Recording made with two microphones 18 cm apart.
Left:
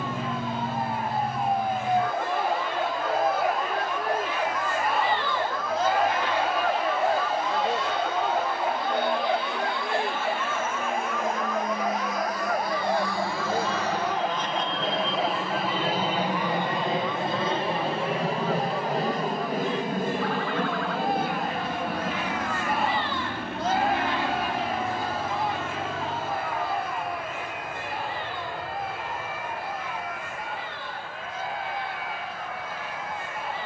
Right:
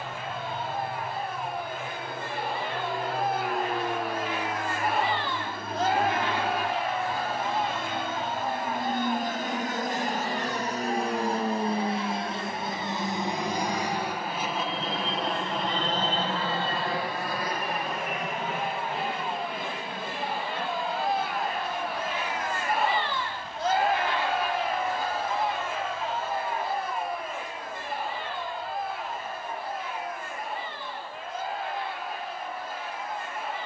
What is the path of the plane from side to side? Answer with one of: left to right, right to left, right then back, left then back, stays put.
right to left.